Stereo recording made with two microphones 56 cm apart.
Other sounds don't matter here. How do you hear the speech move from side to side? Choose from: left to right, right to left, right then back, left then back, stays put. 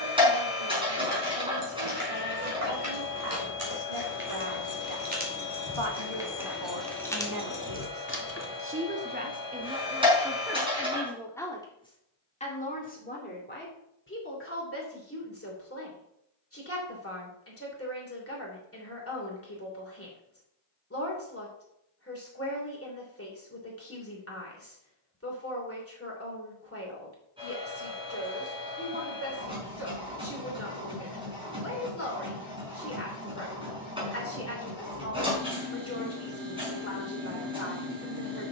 right to left.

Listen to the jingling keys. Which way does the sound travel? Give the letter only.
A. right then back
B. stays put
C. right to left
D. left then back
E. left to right
C.